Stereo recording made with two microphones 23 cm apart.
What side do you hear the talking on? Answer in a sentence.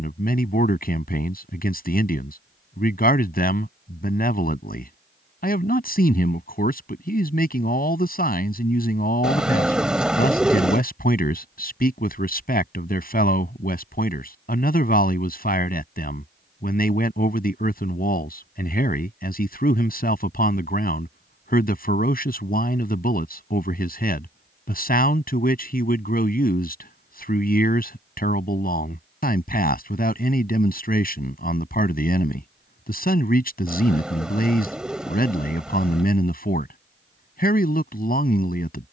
In this clip you hear the talking on the left.